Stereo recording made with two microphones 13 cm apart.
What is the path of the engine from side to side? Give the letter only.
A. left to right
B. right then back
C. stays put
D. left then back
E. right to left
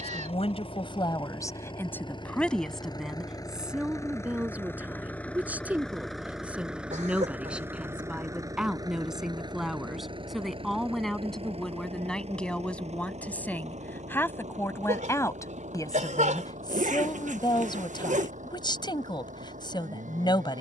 A.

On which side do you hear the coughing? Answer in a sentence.
You can hear the coughing on the right.